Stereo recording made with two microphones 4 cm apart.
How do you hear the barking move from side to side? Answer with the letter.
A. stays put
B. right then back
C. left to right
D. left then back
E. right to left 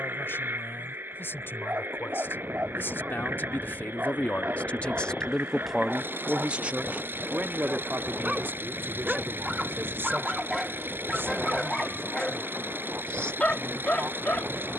E.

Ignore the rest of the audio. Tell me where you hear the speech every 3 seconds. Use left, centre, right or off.
left, left, right, right, right.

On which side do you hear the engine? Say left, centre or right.
right.